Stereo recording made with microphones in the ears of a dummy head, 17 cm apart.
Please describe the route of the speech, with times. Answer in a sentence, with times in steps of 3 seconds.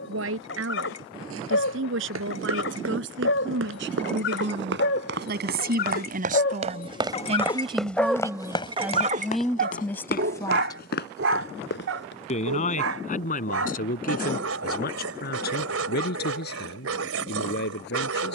You can hear the speech on the right from 0 s, in the centre from 9 s and on the left from 12 s.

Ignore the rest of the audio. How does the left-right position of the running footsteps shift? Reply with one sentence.
You can hear the running footsteps travel towards the left.